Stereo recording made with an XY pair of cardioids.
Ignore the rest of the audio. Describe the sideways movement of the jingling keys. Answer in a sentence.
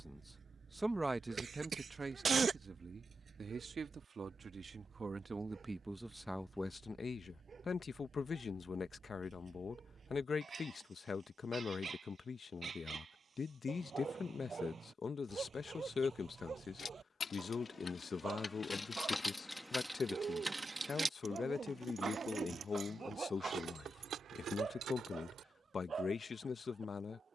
You can hear the jingling keys go from the left side to the right.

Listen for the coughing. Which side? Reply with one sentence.
You can hear the coughing on the right.